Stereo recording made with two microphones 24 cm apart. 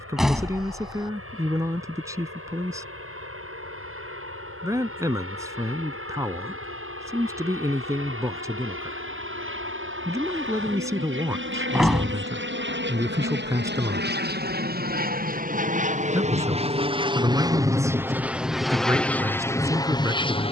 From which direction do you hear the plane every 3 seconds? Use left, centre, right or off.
right, right, right, right, right, right, centre.